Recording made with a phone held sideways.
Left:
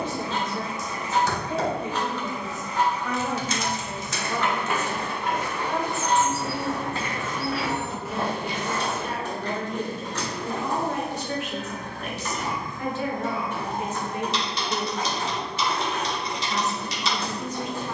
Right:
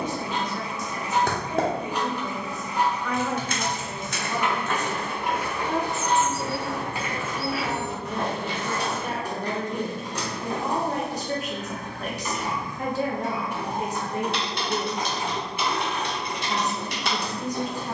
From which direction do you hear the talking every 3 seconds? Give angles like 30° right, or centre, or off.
20° left, 10° right, 40° right, 40° right, 40° right, 40° right.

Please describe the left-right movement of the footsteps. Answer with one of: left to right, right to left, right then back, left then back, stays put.
right then back.